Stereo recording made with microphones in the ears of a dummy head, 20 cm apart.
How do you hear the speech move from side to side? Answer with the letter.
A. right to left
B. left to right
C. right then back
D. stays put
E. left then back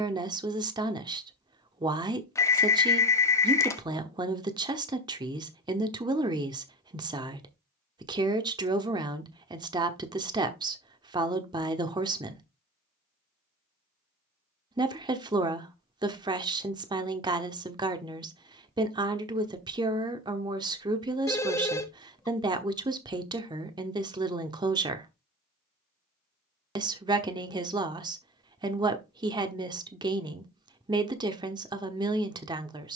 D.